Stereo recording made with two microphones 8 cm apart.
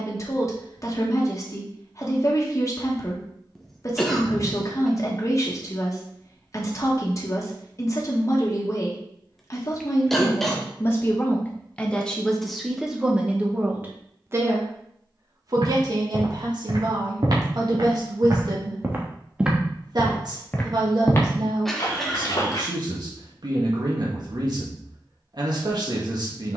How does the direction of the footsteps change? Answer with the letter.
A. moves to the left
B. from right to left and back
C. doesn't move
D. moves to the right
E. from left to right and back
A.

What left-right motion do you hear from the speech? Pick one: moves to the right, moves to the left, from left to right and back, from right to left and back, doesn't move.
moves to the right.